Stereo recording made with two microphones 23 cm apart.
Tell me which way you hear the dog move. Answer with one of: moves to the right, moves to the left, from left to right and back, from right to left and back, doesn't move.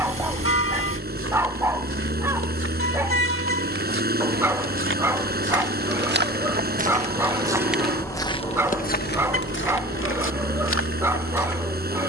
doesn't move.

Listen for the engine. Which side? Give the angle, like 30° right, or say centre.
40° right.